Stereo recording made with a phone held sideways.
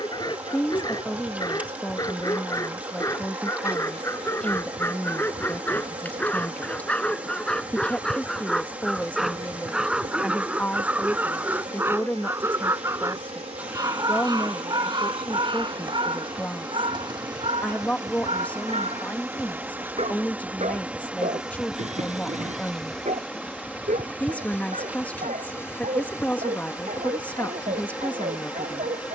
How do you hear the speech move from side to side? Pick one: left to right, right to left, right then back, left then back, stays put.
stays put.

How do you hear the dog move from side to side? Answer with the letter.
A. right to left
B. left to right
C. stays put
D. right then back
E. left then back
B.